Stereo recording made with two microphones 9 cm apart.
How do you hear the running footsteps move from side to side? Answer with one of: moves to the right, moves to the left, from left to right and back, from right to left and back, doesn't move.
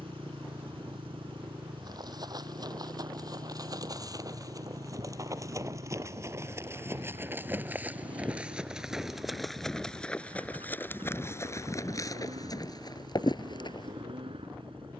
moves to the left.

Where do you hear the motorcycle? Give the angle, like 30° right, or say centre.
80° right.